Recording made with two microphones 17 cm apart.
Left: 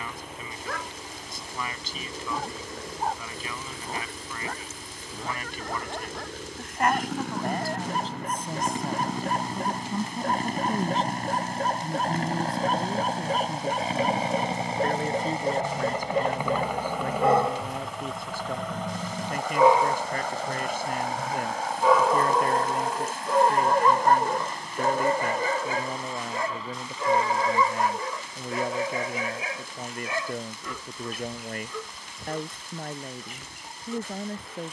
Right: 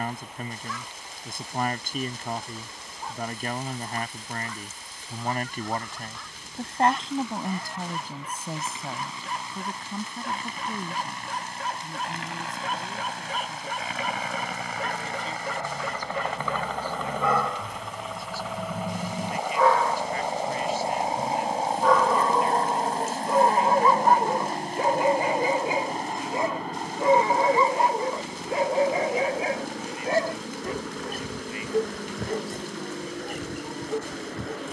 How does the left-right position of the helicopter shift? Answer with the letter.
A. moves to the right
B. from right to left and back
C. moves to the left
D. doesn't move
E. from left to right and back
A.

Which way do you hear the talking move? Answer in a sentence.
In this clip you hear the talking go from the right side to the left.